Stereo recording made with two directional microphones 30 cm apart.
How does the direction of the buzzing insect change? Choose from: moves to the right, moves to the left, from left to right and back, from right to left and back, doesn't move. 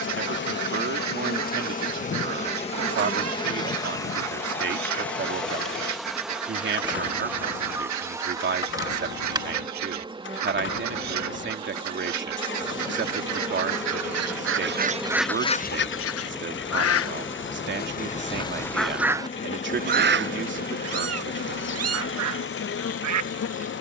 from left to right and back.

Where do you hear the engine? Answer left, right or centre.
left.